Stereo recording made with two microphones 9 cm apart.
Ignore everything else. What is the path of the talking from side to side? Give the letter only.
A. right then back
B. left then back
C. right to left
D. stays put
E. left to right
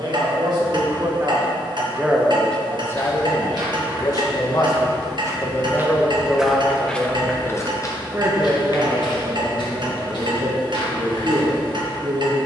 B.